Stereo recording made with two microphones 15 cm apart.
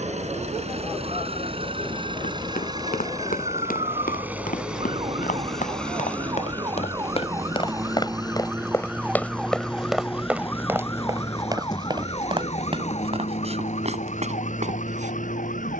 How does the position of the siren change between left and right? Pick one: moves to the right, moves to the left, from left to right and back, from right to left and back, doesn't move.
moves to the left.